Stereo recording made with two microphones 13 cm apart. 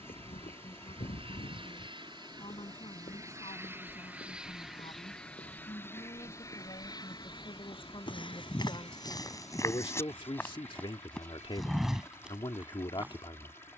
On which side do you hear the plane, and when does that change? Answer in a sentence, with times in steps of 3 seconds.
In this clip you hear the plane on the right from 0 s, in the centre from 3 s and on the left from 6 s.